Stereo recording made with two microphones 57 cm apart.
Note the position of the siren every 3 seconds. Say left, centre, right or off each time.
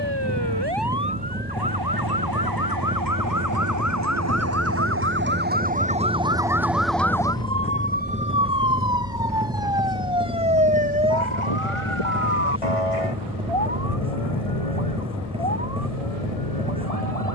right, right, centre, left, left, left.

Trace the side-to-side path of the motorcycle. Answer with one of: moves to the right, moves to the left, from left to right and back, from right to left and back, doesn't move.
doesn't move.